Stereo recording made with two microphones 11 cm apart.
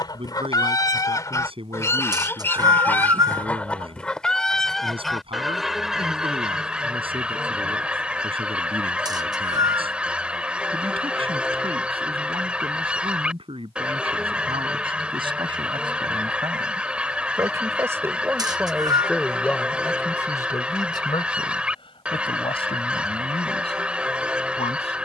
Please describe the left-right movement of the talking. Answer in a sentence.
You can hear the talking travel towards the left.